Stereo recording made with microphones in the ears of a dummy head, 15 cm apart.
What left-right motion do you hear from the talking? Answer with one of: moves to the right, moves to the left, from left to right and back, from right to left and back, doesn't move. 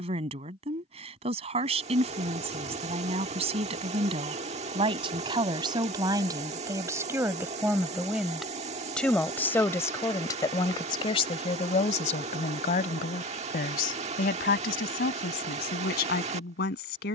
moves to the left.